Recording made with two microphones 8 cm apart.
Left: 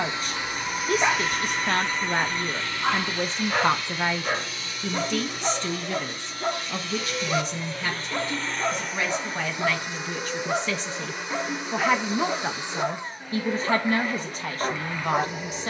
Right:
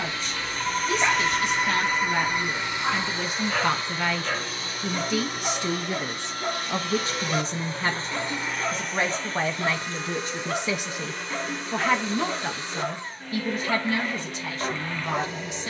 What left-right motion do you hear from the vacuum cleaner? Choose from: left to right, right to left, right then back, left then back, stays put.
right then back.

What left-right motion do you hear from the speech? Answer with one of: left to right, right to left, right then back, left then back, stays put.
right then back.